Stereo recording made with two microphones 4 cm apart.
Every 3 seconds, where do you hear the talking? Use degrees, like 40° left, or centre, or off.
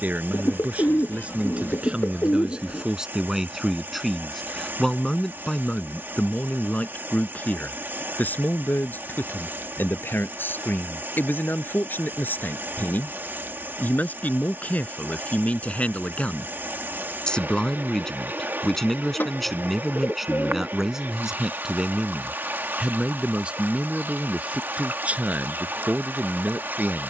30° right, 10° left, 40° left, 60° left, 50° left, 30° left, centre, 20° right, 40° right.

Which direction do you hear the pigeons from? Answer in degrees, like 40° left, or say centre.
60° left.